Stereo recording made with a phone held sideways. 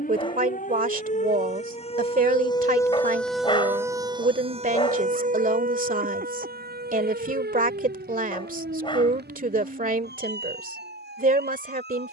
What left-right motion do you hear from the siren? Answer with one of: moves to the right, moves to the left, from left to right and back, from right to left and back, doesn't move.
moves to the right.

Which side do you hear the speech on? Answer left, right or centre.
right.